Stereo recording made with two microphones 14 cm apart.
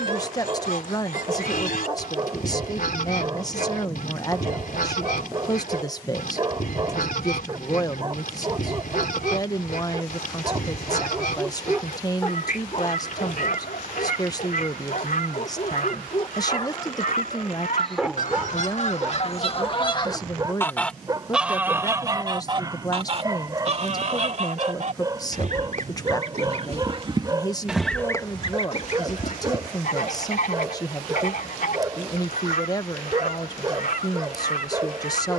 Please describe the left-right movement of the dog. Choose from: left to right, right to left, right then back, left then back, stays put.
left then back.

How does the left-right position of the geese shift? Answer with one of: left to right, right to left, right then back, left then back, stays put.
right then back.